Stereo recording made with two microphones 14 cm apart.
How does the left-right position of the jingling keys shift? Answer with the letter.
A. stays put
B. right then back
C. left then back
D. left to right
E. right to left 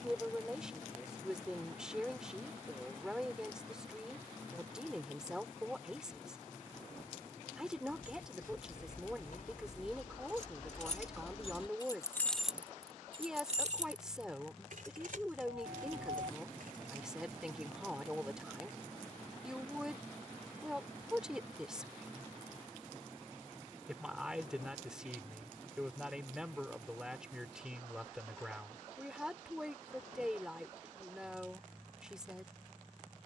D.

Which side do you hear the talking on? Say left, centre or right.
centre.